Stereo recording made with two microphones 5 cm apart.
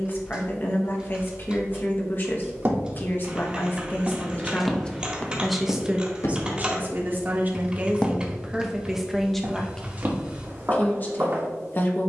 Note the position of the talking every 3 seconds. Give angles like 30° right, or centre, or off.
40° left, 20° left, 30° right, 20° left.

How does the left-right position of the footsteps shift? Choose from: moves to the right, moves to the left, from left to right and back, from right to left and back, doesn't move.
from right to left and back.